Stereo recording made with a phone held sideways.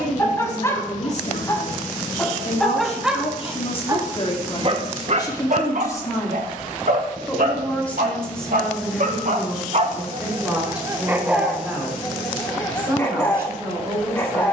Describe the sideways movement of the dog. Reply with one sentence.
In this clip you hear the dog go right and come back.